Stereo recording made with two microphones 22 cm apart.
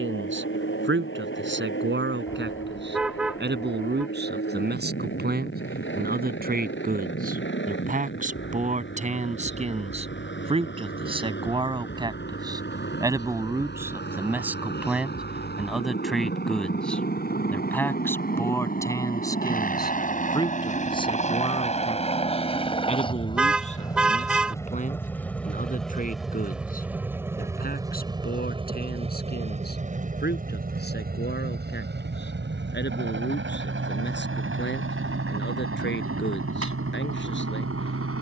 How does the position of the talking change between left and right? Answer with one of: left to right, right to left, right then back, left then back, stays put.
right to left.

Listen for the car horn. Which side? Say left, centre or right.
centre.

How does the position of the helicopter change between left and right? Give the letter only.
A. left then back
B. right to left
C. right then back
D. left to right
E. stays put
D.